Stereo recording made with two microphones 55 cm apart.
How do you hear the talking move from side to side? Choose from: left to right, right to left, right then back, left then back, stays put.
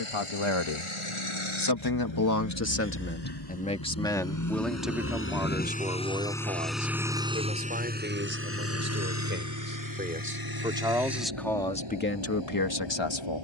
right then back.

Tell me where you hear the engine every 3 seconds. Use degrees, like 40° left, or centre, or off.
60° left, 30° left, 10° right, 40° right, 50° right.